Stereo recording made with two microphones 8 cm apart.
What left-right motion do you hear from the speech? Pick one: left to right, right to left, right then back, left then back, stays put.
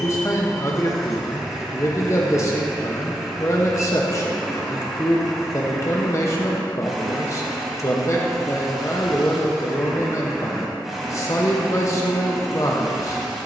stays put.